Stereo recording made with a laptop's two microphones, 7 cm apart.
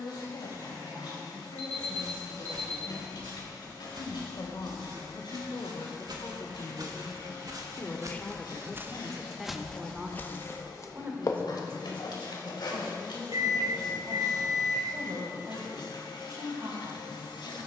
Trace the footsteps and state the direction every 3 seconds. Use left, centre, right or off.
right, right, right, left, left, off.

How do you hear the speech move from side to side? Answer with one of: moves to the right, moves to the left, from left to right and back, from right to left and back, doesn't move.
moves to the right.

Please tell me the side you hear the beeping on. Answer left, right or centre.
right.